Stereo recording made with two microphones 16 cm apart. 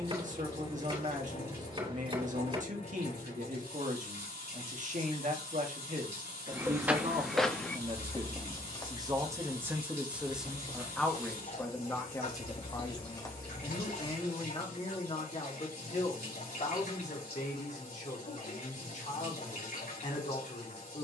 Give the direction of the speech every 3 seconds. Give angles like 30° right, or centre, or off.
60° right, 60° right, 40° right, centre, 30° left, 50° left, 50° left.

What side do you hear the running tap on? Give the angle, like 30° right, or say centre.
80° left.